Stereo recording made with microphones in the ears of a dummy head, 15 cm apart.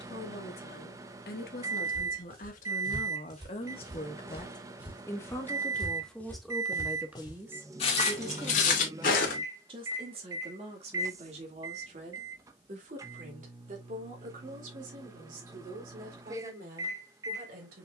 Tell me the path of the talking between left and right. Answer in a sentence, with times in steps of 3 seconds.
In this clip you hear the talking on the left from 0 s, in the centre from 6 s and on the right from 9 s.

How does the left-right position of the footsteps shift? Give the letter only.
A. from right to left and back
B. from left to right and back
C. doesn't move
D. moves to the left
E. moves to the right
D.